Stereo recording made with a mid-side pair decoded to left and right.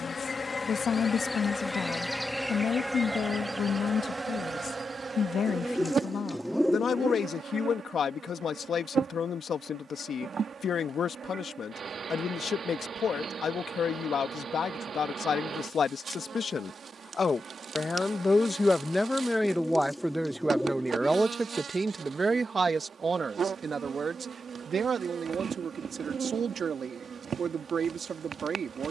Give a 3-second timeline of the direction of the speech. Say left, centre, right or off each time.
left, left, left, left, left, left, centre, right, right, right.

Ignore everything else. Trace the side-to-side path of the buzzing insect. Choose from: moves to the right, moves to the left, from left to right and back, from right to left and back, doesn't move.
moves to the right.